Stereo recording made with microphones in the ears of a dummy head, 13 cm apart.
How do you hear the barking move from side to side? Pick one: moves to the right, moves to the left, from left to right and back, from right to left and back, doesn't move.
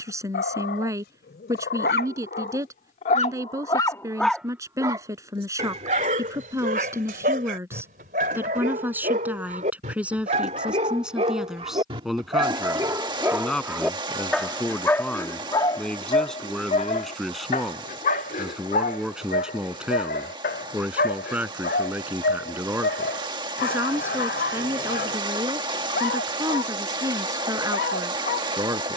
from left to right and back.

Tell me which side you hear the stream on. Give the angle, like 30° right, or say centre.
30° right.